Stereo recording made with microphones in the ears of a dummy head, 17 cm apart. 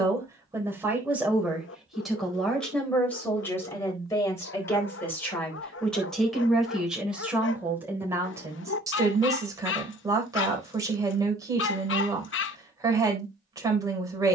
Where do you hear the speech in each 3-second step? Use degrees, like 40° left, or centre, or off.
centre, 10° left, 10° right, 20° right, 20° right.